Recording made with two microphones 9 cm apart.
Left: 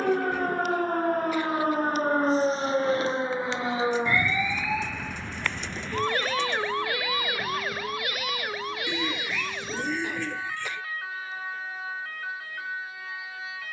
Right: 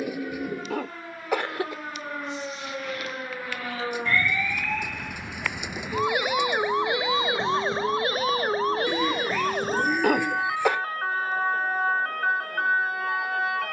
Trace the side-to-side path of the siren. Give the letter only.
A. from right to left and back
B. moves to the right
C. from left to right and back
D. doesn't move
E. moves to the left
B.